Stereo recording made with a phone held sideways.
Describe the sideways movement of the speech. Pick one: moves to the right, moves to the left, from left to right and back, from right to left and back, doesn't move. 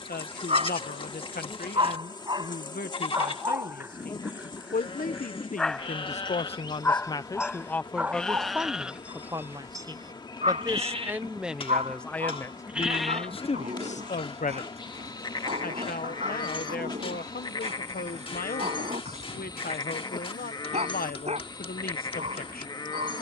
from left to right and back.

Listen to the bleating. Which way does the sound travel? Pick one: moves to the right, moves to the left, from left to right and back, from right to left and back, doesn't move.
from left to right and back.